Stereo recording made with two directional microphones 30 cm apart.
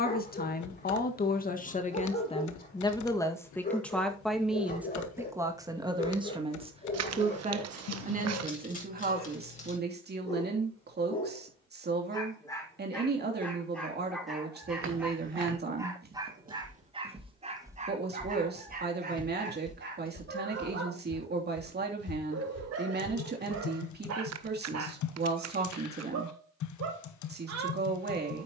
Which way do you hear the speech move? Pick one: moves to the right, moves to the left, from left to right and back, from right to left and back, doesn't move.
moves to the right.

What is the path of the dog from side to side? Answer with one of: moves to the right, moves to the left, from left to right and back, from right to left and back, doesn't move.
moves to the right.